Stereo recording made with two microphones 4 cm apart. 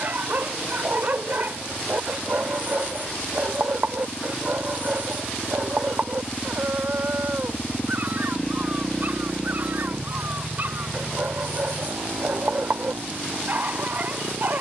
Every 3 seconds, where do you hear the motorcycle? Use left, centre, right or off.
left, left, left, right, right.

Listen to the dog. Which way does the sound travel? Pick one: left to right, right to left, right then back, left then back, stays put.
stays put.